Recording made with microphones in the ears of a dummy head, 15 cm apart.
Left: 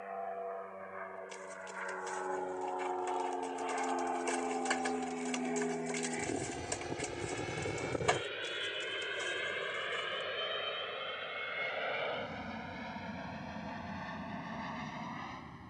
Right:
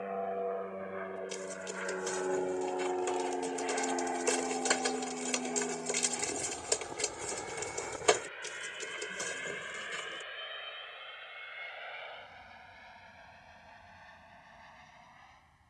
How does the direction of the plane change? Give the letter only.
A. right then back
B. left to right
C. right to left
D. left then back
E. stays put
C.